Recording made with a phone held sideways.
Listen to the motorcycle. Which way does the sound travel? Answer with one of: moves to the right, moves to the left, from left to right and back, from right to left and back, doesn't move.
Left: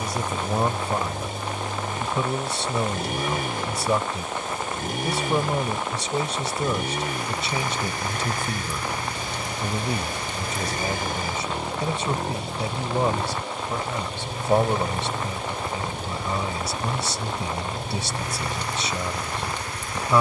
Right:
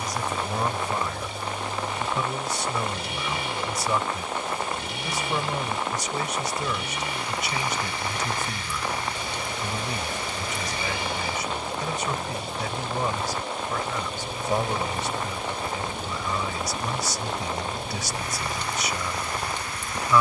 doesn't move.